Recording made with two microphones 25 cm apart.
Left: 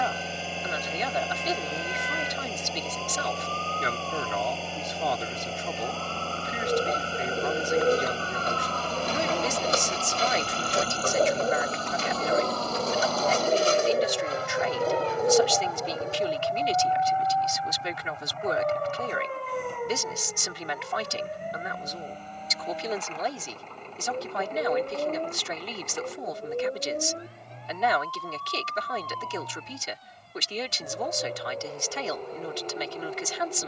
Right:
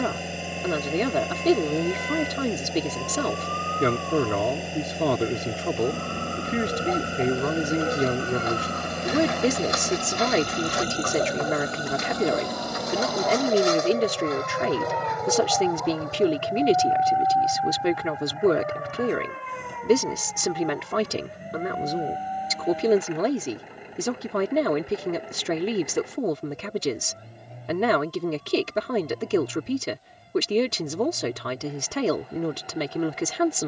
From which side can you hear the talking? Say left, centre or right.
right.